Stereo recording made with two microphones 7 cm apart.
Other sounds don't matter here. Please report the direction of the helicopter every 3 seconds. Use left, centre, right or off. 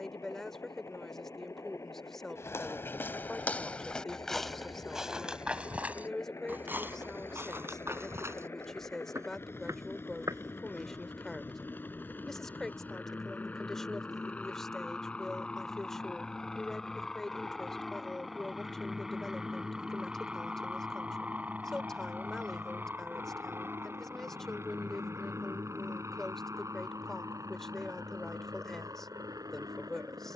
left, left, left, left, left, centre, centre, right, right, right.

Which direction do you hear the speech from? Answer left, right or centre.
centre.